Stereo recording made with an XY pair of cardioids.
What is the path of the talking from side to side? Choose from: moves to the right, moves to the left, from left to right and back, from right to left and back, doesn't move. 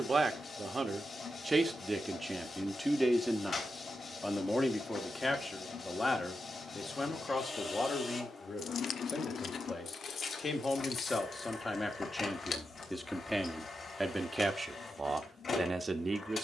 from right to left and back.